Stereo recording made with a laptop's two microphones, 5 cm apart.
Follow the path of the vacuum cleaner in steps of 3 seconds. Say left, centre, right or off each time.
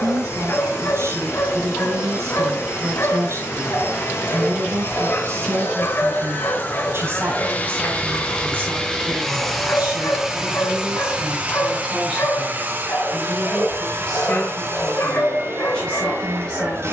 left, left, left, centre, right, right.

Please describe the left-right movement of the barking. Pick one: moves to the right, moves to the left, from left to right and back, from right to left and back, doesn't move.
doesn't move.